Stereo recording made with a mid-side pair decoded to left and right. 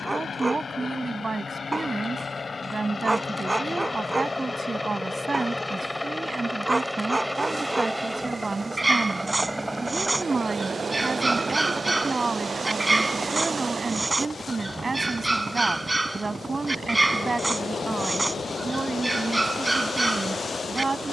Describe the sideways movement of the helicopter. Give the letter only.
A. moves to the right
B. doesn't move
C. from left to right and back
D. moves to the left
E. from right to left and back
A.